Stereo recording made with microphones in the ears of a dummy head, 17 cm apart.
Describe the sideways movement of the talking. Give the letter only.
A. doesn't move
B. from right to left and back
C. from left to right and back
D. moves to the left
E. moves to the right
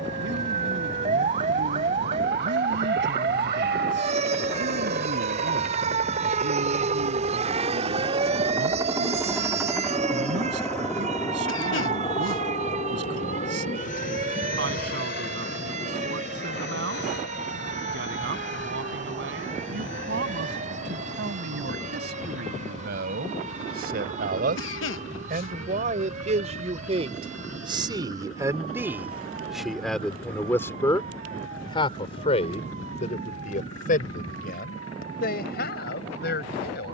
D.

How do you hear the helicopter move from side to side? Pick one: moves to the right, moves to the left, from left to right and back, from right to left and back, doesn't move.
moves to the left.